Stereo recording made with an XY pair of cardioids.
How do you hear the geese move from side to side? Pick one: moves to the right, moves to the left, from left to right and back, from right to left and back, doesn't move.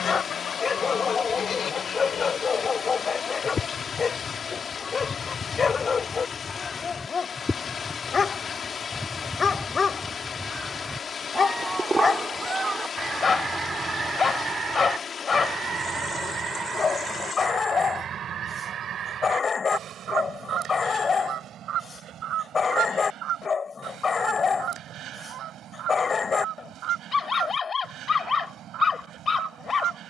moves to the right.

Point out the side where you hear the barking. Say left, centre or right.
left.